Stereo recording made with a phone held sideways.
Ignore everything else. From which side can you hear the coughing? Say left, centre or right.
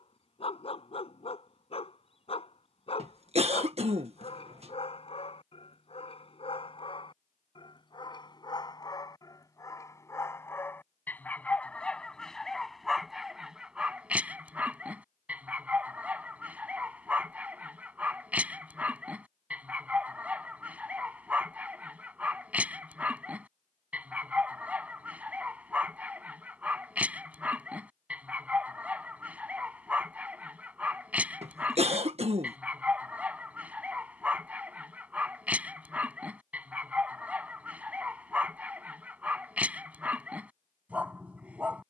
right.